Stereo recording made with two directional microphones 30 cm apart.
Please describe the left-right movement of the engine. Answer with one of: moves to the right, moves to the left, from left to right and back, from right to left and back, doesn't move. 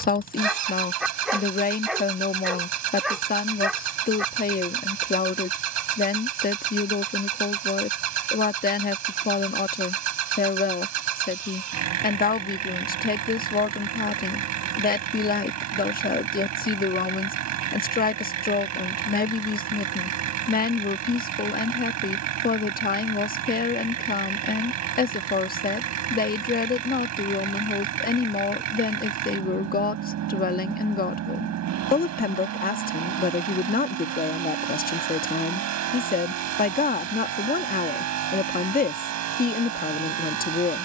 doesn't move.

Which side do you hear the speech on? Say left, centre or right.
left.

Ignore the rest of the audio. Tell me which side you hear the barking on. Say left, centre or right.
centre.